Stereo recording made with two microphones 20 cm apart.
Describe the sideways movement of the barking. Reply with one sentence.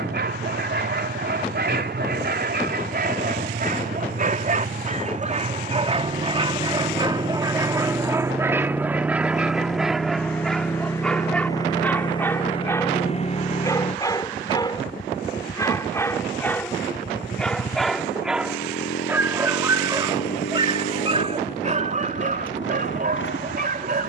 You can hear the barking move from right to left and back again.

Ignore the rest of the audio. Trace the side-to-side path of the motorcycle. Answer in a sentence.
You can hear the motorcycle go from the right side to the left.